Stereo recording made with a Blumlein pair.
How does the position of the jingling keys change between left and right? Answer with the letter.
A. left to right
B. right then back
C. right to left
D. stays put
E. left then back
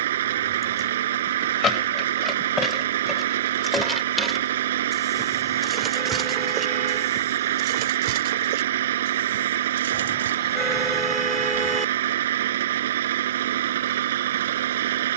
A.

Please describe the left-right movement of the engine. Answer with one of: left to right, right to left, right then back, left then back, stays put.
stays put.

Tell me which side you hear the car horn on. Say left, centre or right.
centre.